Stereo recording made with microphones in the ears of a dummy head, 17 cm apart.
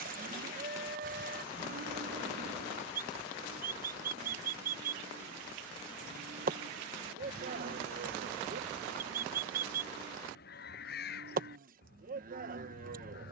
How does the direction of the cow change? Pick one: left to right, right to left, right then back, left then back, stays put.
stays put.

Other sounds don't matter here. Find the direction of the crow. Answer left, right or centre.
left.